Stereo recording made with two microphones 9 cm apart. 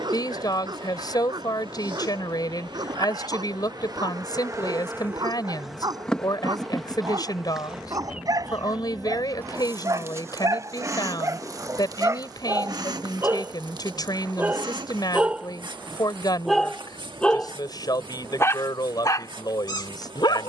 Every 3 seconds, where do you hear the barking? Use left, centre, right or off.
right, right, right, right, right, centre, left.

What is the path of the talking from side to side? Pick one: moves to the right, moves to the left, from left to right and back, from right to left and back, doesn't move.
doesn't move.